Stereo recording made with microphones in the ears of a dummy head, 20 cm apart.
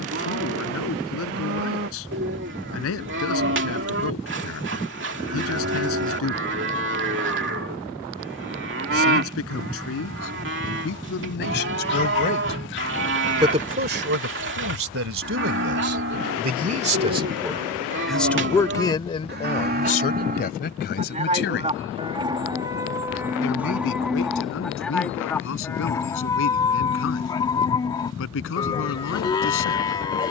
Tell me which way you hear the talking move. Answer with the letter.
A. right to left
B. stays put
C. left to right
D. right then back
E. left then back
D.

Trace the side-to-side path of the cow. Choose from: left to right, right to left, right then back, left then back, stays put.
right to left.